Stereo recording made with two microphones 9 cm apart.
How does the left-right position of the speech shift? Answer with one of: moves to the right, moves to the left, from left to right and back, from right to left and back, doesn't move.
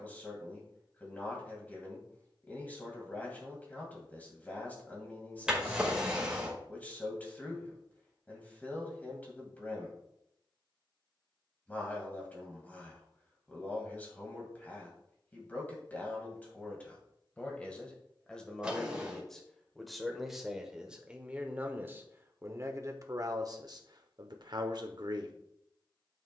moves to the right.